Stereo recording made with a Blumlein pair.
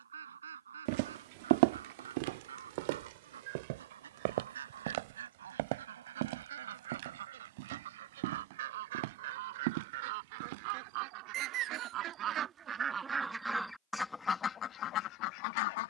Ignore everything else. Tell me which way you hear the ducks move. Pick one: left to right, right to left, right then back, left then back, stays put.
right to left.